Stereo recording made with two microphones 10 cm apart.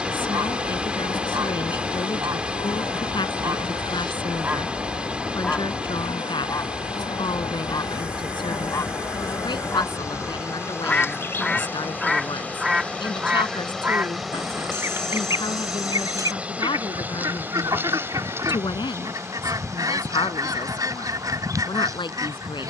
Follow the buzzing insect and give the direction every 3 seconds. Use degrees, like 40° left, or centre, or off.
50° left, 50° left, 40° left, 30° left, 10° left, 10° right, 30° right, 30° right.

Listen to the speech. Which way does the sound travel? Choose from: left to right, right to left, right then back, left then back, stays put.
stays put.